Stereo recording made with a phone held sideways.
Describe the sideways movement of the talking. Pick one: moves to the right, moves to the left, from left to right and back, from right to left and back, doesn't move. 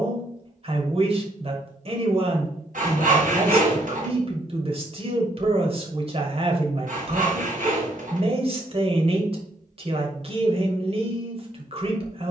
doesn't move.